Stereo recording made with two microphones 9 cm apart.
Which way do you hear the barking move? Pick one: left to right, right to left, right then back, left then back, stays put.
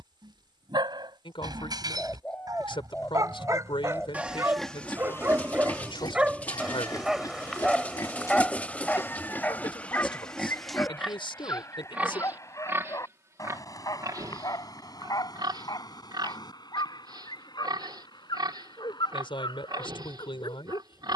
right to left.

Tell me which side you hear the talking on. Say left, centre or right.
left.